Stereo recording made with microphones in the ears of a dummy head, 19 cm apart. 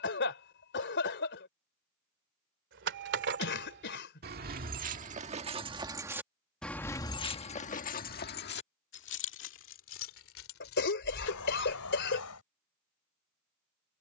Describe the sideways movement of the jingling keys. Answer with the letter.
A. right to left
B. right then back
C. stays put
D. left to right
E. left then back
A.